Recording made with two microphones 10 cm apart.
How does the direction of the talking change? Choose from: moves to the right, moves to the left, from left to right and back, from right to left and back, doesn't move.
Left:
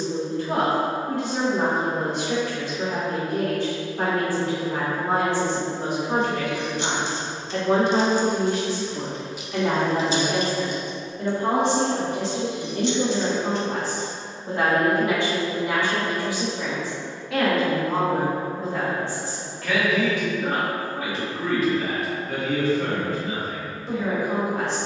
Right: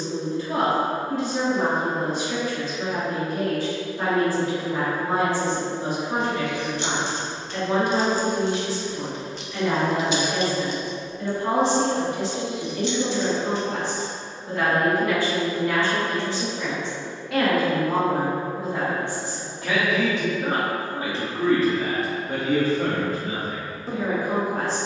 moves to the right.